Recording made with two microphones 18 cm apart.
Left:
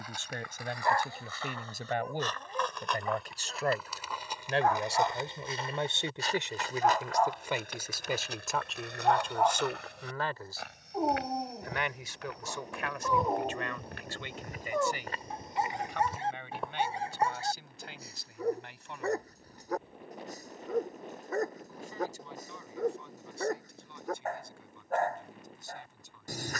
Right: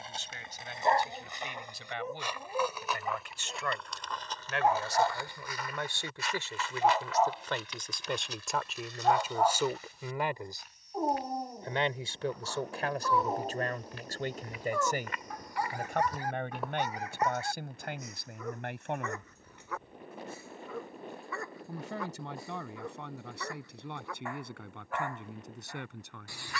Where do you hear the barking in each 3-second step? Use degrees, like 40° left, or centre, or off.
20° right, 10° right, 10° right, centre, 20° left, 30° left, 40° left, 40° left, 40° left.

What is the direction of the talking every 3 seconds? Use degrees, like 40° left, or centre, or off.
50° left, 30° left, 10° left, 10° right, 40° right, 50° right, 60° right, 70° right, 70° right.